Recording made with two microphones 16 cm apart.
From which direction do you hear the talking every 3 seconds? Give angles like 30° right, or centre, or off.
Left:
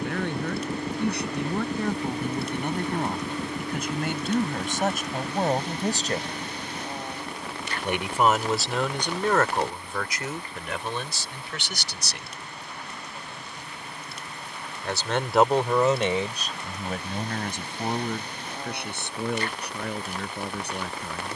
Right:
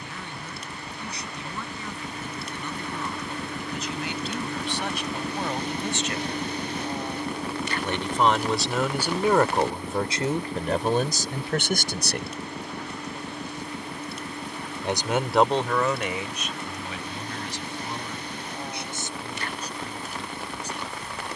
60° left, 50° left, 10° left, 30° right, 40° right, 30° left, 60° left.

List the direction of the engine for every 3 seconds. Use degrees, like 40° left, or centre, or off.
40° left, centre, 30° right, 50° right, 60° right, 60° right, 60° right.